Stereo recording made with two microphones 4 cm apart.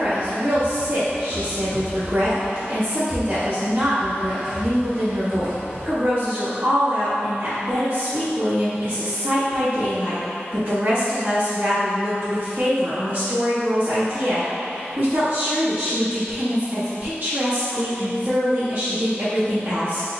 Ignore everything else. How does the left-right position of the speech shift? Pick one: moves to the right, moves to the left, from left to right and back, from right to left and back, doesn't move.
doesn't move.